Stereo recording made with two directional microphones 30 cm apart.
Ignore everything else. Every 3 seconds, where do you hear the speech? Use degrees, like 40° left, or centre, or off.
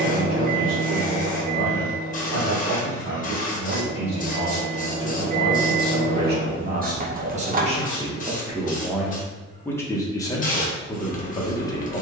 50° right, 40° right, 20° right, 10° left.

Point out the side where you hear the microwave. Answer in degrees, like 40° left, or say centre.
30° right.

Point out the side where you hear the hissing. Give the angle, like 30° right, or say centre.
30° left.